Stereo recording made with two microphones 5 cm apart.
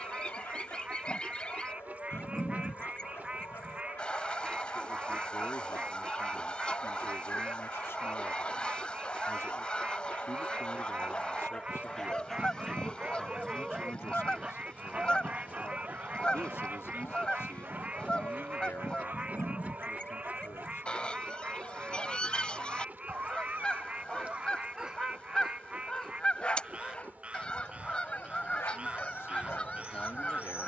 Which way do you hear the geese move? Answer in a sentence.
In this clip you hear the geese stay in one place.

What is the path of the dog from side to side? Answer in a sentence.
In this clip you hear the dog go right and come back.